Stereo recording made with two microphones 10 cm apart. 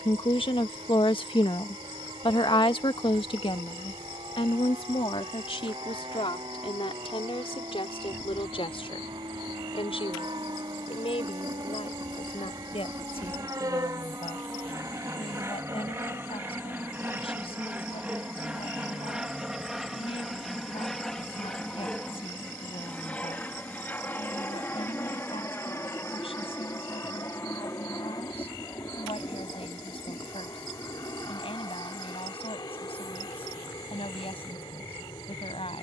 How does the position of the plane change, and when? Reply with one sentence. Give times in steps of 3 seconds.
You can hear the plane on the right from 0 s, in the centre from 18 s and on the left from 24 s.